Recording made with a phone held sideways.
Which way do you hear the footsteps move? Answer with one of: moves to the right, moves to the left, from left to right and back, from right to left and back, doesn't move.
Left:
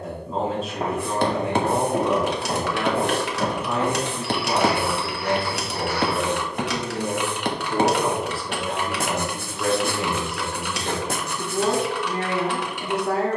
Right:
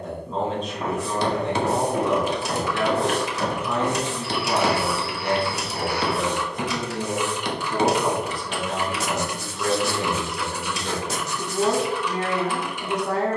moves to the right.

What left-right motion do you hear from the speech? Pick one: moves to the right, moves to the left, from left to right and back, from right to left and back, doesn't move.
doesn't move.